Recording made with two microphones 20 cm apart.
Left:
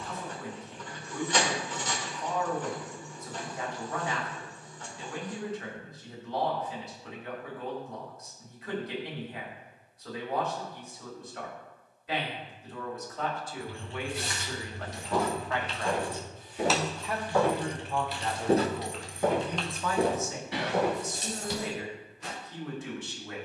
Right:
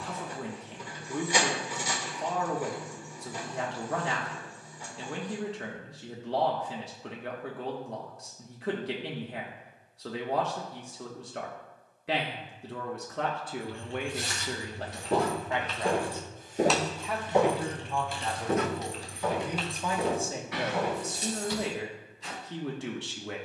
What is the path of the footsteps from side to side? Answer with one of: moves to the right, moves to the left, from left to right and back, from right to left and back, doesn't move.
moves to the left.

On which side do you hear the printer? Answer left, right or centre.
centre.